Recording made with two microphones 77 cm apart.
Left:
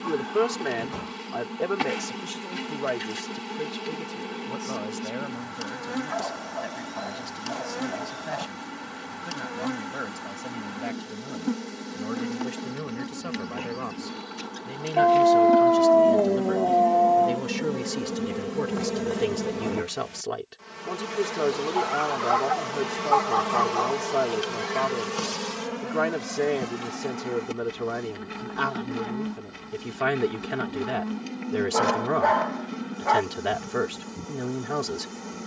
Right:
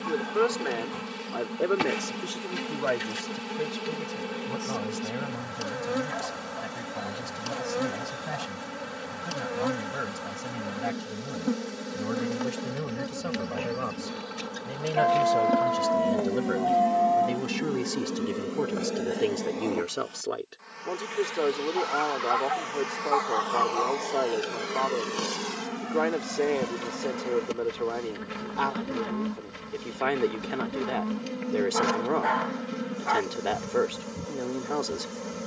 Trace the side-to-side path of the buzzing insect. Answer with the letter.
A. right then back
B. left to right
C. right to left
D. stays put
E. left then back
E.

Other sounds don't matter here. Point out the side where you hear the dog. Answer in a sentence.
You can hear the dog on the left.